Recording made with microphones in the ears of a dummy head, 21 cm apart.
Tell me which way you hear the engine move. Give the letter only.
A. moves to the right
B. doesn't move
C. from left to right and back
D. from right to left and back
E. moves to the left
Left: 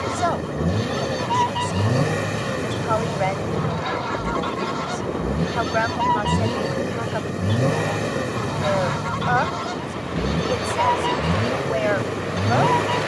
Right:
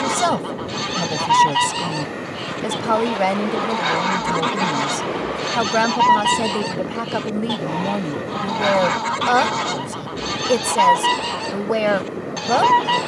B.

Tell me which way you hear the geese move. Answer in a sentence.
You can hear the geese stay put.